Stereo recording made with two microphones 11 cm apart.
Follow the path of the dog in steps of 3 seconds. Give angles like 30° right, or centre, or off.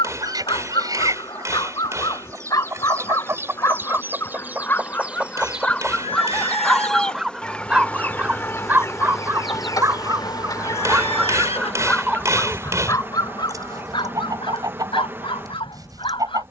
40° left, 20° left, 10° right, 20° right, 40° left, 50° left.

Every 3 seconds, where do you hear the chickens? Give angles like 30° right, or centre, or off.
30° right, 20° right, 10° left, 30° left, 30° right, 40° right.